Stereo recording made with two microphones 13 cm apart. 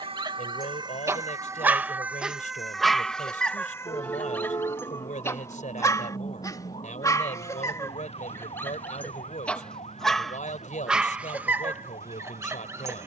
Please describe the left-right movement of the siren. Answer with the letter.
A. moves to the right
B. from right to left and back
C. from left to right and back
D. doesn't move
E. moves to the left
E.